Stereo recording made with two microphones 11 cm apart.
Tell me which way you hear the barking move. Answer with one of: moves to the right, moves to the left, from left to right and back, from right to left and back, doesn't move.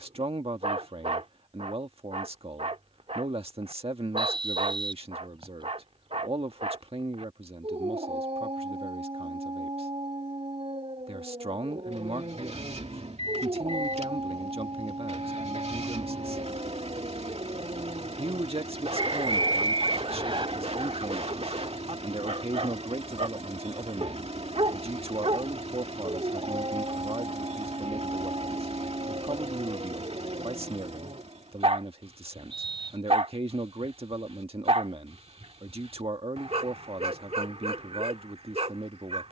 doesn't move.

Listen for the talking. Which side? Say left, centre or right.
right.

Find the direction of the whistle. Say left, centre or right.
right.